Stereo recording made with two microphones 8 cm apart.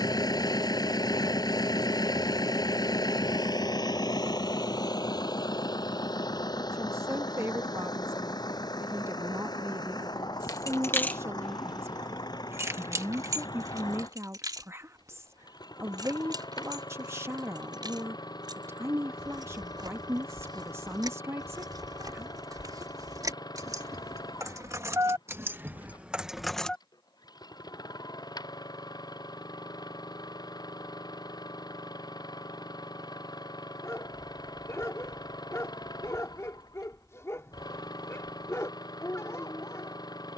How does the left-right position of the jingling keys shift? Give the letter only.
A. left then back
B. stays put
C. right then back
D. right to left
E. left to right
C.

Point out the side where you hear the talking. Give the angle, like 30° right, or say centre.
30° right.